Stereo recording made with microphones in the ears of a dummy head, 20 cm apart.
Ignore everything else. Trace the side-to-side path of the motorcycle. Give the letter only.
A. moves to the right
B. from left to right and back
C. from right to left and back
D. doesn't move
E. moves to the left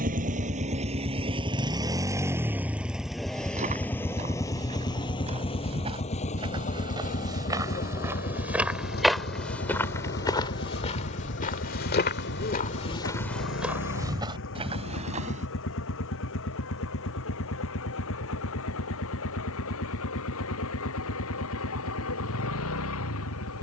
E.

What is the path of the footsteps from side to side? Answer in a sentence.
You can hear the footsteps go left and come back.